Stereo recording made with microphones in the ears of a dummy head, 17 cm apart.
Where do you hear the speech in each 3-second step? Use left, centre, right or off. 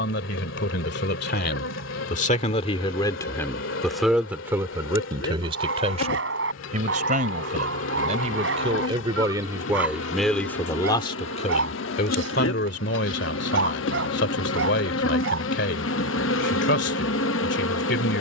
left, centre, right, centre, left, left.